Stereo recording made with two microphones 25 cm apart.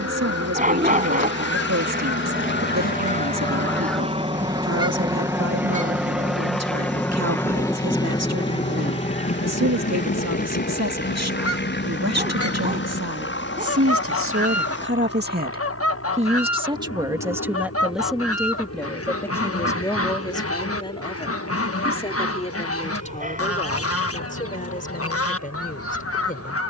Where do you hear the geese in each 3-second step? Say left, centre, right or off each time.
left, centre, centre, left, left, left, left, left, left.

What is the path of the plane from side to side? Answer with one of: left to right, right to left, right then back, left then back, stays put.
right to left.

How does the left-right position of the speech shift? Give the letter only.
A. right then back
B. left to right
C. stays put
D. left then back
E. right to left
E.